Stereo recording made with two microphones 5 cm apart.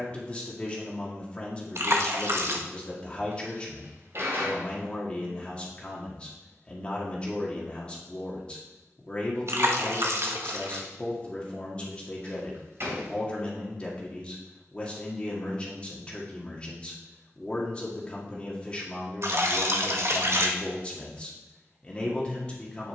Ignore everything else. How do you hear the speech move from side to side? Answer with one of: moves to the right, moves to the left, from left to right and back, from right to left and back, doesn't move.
doesn't move.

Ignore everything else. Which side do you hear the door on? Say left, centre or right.
right.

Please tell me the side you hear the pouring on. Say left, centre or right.
right.